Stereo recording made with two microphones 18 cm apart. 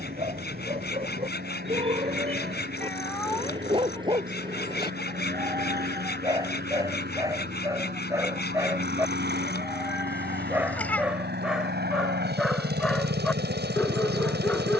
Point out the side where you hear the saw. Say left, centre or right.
left.